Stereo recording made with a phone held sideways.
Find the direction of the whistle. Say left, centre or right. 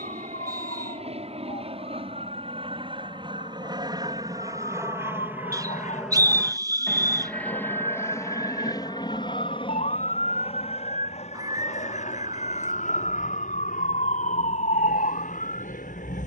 right.